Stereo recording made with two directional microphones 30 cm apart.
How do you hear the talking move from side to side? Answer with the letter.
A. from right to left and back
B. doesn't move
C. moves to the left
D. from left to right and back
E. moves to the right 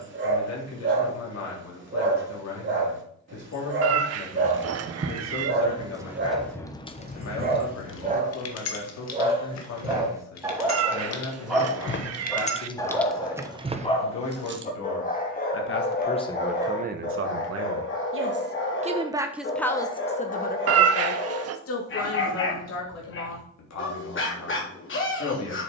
D.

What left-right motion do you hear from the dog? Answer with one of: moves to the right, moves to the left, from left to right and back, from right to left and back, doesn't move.
moves to the left.